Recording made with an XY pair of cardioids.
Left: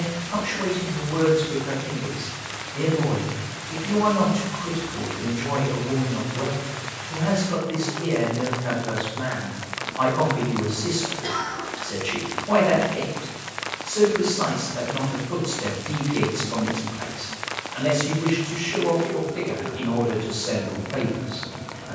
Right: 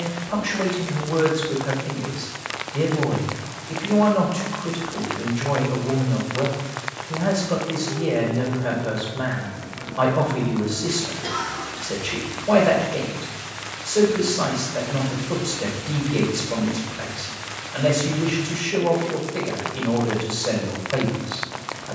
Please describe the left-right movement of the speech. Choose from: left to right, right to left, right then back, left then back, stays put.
stays put.